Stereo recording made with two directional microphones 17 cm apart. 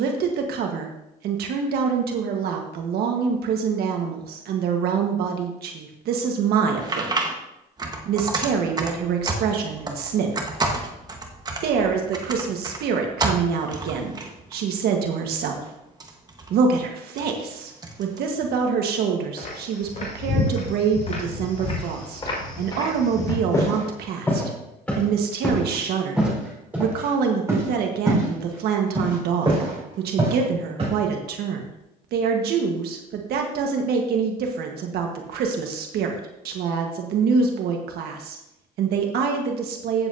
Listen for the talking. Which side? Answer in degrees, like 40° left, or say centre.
70° right.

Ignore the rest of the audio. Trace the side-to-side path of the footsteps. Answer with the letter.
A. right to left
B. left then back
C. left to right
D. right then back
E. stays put
C.